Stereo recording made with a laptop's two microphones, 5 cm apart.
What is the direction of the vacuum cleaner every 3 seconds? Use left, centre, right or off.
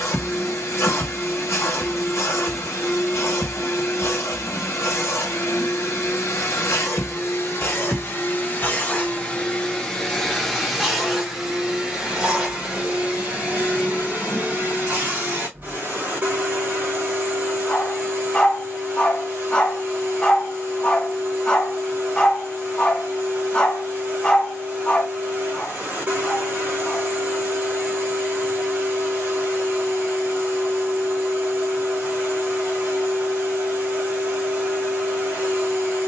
left, left, left, centre, right, right, right, right, right, right, right, right.